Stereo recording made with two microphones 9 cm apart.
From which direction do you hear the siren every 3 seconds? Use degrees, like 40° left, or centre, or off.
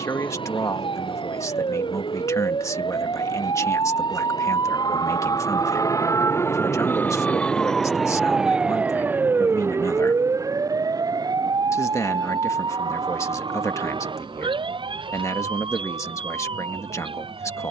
70° left, 50° left, 10° left, 30° right, 50° right, 60° right.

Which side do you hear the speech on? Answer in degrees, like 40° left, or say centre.
30° left.